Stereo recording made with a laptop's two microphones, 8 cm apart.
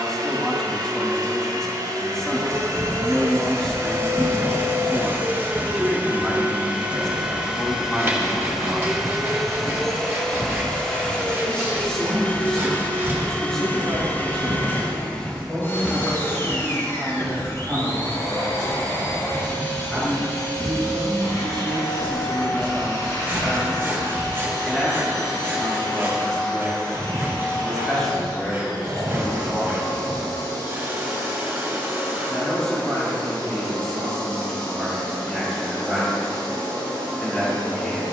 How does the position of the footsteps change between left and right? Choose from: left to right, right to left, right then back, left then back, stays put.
right then back.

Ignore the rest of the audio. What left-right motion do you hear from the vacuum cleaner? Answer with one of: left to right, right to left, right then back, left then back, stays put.
right to left.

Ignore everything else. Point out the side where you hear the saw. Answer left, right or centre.
right.